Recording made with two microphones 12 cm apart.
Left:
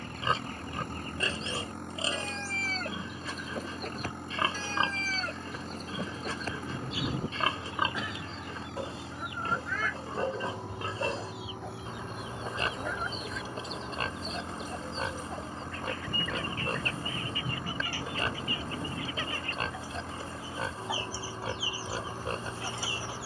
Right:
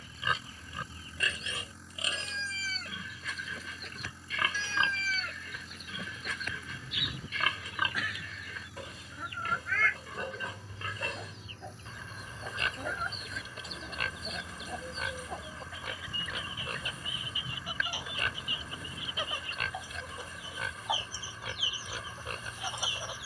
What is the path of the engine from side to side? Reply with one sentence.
In this clip you hear the engine stay in one place.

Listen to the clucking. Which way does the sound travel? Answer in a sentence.
In this clip you hear the clucking move from left to right.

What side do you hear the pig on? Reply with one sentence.
In this clip you hear the pig on the left.